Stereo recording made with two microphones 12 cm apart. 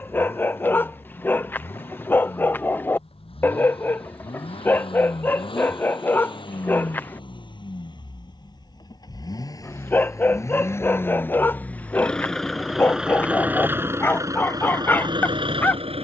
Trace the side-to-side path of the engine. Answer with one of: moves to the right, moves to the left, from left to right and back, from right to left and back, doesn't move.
moves to the right.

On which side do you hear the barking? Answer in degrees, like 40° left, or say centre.
20° left.